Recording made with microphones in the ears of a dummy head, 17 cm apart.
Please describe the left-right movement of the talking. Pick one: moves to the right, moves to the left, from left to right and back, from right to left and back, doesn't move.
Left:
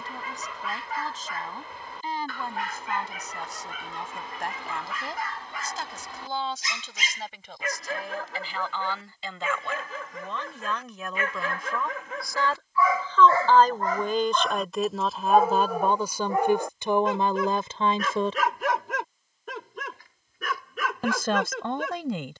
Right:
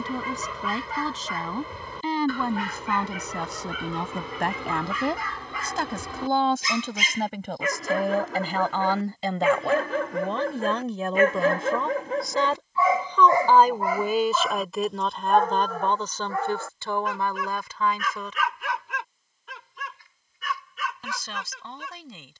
moves to the left.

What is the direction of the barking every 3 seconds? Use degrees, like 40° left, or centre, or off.
80° right, 70° right, 60° right, 40° right, 10° right, 20° left, 40° left, 50° left.